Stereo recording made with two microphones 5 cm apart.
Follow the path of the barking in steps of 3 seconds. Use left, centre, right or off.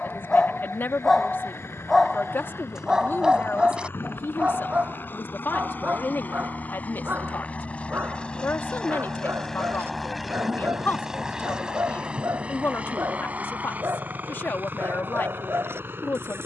centre, right, right, right, right, right.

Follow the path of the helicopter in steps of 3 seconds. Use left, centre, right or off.
left, left, left, centre, right, right.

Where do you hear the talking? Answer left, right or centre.
left.